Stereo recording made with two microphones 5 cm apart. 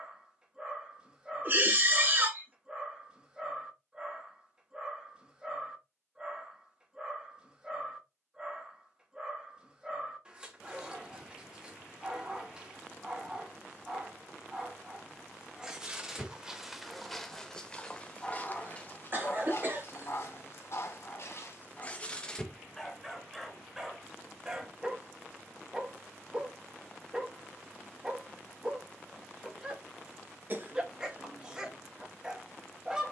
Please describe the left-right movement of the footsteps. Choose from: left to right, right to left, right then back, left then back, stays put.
right to left.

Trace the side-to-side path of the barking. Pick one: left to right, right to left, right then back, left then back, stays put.
left then back.